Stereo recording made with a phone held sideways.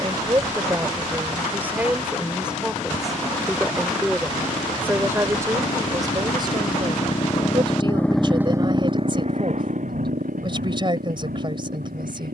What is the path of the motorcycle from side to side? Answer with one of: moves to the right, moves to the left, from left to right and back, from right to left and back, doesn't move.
moves to the right.